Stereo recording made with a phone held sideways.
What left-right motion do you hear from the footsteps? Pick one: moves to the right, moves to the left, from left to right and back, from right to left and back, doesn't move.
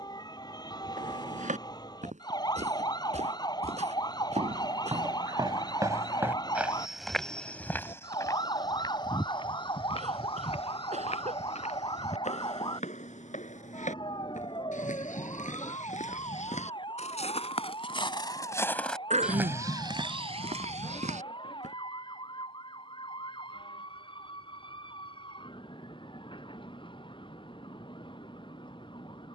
from right to left and back.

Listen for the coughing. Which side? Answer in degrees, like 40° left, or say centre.
60° right.